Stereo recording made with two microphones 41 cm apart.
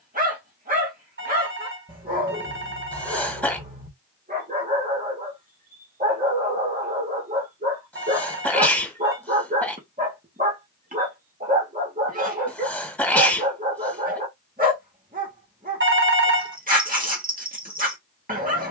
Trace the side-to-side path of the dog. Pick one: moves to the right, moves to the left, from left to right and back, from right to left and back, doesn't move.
doesn't move.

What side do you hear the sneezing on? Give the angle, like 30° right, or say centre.
centre.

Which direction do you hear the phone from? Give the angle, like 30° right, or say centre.
30° right.